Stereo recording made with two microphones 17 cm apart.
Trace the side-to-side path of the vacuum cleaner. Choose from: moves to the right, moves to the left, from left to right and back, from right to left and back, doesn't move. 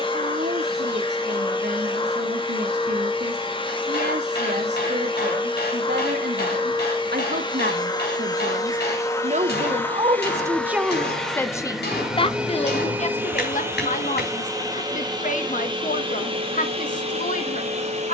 moves to the right.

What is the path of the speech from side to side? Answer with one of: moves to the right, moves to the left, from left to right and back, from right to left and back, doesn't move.
moves to the left.